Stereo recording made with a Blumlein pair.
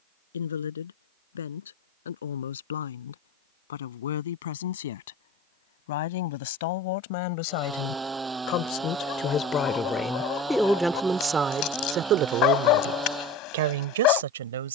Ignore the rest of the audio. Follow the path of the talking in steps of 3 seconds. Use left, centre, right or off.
left, left, left, centre, right.